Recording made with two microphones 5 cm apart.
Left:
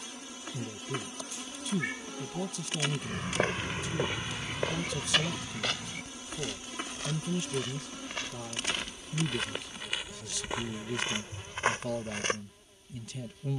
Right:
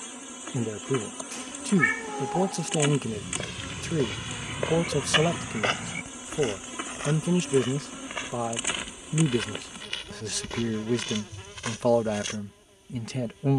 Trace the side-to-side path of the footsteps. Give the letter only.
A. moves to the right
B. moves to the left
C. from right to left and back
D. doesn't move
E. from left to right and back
E.